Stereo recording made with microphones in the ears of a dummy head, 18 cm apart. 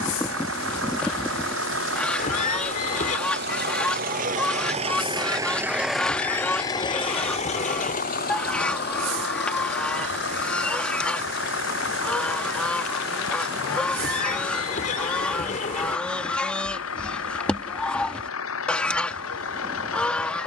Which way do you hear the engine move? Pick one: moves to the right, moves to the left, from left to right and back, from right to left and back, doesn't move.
moves to the left.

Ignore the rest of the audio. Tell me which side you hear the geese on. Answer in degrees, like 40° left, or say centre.
10° left.